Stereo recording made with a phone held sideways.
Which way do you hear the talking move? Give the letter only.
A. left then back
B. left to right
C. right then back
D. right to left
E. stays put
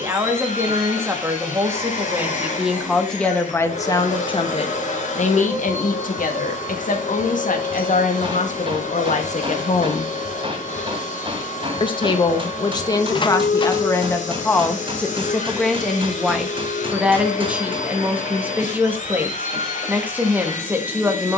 A.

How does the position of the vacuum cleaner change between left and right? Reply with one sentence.
In this clip you hear the vacuum cleaner stay put.